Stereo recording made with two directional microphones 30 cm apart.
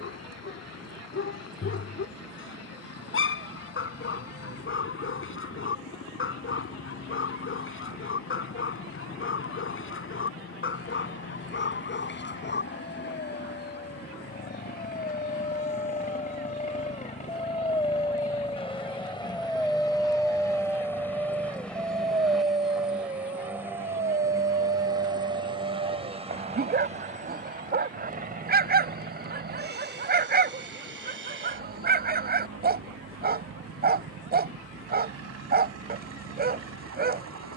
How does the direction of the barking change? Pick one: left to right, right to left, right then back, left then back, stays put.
left to right.